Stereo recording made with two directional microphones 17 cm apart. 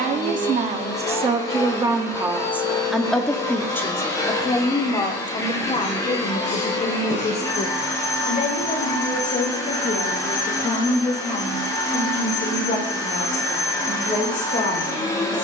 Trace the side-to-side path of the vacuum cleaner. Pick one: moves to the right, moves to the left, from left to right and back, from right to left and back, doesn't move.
doesn't move.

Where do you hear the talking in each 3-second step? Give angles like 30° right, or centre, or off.
30° right, 20° left, 40° left, 50° left, 50° left.